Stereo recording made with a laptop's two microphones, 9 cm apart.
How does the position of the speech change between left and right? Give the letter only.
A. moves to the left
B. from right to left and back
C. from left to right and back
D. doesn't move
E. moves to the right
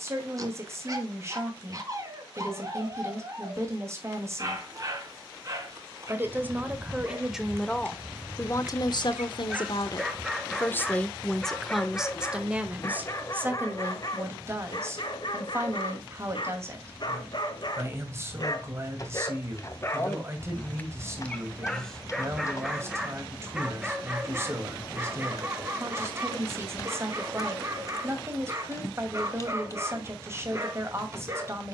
B.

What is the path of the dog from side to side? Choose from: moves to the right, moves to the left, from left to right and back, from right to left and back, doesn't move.
from right to left and back.